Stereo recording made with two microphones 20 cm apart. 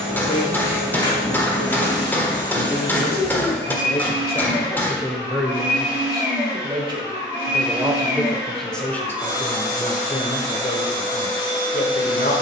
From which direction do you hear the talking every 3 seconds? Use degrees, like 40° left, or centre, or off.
60° left, 20° left, 10° right, 30° left.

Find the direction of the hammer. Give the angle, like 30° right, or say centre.
10° left.